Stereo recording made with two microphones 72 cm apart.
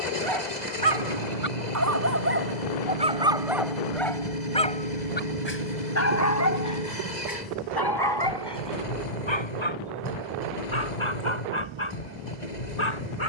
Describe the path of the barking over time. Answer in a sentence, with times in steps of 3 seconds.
You can hear the barking on the right from 0 s, in the centre from 3 s and on the left from 6 s.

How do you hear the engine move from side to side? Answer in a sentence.
In this clip you hear the engine stay put.